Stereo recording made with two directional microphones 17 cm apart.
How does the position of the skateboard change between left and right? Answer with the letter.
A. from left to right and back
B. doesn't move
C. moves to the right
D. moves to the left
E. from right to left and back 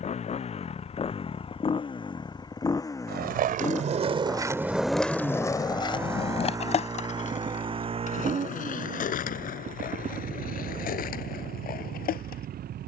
D.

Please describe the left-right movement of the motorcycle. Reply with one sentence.
You can hear the motorcycle travel towards the right.